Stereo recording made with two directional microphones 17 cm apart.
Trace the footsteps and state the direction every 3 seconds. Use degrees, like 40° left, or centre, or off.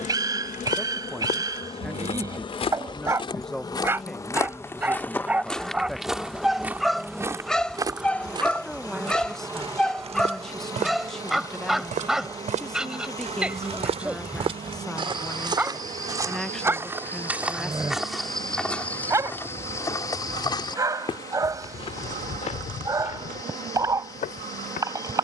40° left, 20° left, 20° right, 40° right, 40° right, 20° right, 10° left, 40° left, 50° left.